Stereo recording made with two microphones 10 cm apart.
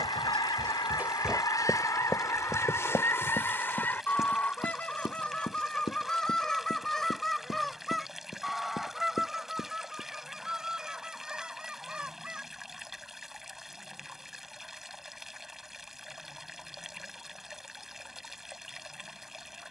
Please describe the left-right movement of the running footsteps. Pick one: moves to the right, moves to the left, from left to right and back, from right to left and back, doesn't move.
moves to the left.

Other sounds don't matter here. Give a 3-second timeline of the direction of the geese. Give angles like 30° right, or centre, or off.
40° left, 20° left, centre, 10° right, 10° right, 10° right, 10° right.